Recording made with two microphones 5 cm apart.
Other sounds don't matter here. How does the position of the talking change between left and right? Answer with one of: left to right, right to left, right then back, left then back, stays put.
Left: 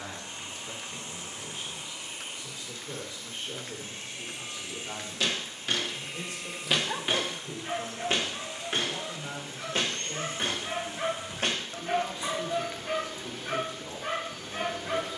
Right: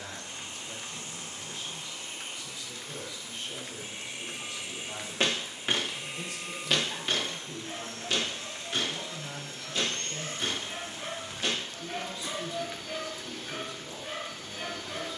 stays put.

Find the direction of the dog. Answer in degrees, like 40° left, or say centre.
60° left.